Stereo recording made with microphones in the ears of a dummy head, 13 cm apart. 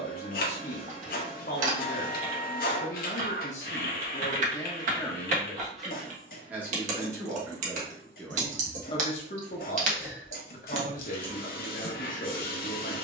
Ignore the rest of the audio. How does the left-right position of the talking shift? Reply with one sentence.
In this clip you hear the talking go right and come back.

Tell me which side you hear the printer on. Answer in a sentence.
You can hear the printer on the left.